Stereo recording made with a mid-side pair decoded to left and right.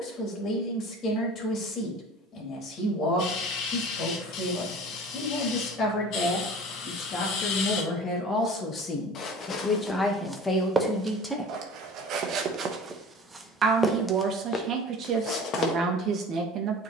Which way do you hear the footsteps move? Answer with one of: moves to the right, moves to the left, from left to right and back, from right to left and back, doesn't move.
from left to right and back.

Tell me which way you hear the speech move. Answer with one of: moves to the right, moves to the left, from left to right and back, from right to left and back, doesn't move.
moves to the right.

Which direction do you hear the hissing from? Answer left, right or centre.
left.